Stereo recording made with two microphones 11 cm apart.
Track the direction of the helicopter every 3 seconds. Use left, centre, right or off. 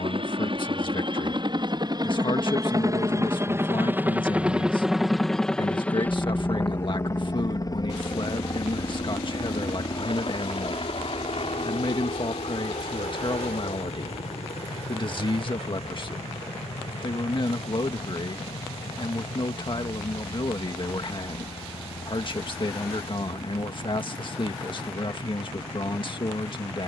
right, centre, left, left, left, left, left, left, left.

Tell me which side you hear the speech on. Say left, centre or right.
left.